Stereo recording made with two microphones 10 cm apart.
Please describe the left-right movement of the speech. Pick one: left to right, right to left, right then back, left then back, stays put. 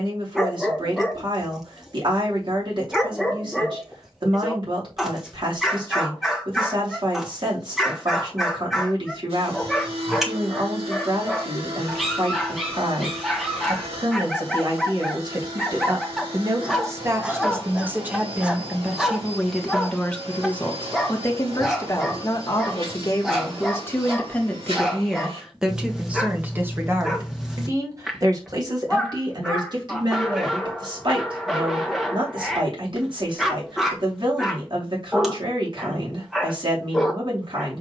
left then back.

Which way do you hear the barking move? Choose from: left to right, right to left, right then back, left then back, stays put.
stays put.